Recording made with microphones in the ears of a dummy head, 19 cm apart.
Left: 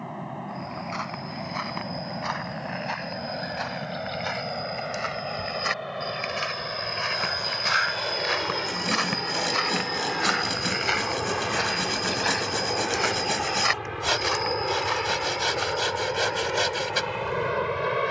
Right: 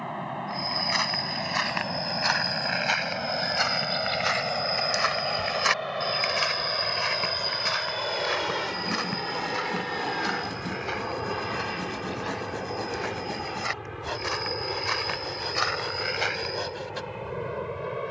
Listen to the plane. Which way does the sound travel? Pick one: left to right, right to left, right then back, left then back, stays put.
right to left.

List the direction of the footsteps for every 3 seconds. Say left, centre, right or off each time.
right, right, centre, left, left, right.